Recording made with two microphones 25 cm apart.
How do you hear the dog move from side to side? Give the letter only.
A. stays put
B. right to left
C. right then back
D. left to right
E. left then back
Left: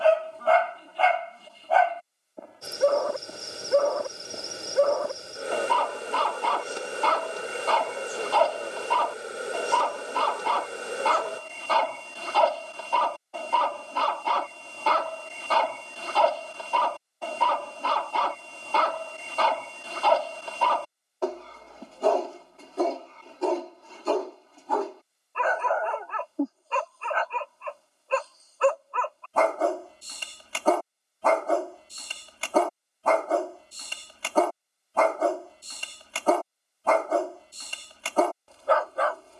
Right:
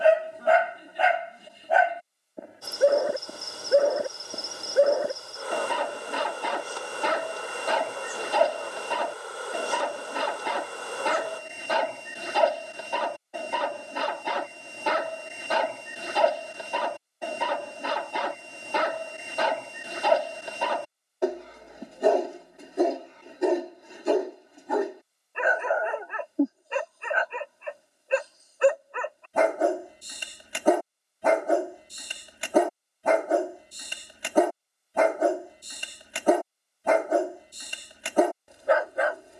A.